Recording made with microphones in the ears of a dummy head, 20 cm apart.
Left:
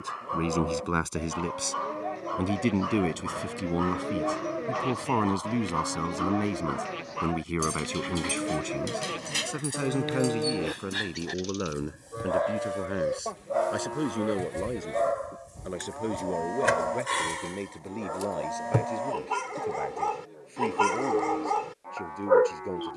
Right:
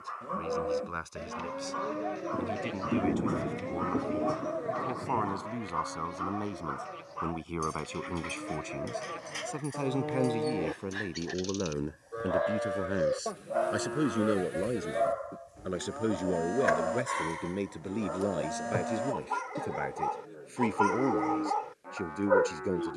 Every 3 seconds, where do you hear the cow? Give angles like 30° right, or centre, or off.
10° right, 30° left, 70° left, 20° left, 10° right, 10° right, 10° right, 10° right.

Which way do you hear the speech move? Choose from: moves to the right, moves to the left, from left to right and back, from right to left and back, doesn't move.
moves to the right.